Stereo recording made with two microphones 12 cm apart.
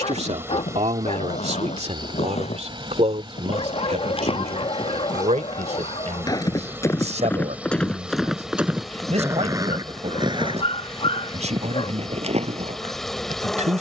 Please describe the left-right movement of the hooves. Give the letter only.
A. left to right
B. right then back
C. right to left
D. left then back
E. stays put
A.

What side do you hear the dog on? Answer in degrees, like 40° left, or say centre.
50° left.